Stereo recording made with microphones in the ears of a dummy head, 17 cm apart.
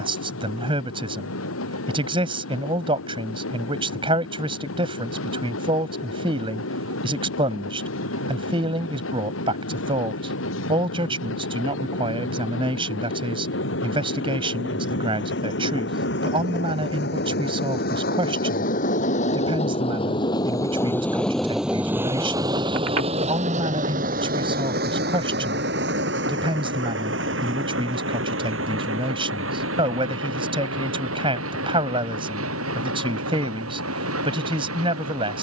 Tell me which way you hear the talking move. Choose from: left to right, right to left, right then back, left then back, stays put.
stays put.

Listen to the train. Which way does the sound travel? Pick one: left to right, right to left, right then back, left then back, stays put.
left to right.